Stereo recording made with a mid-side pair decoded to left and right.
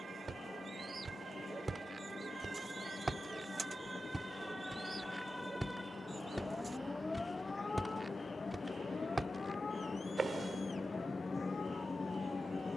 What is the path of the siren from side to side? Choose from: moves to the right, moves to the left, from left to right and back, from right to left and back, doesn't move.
moves to the left.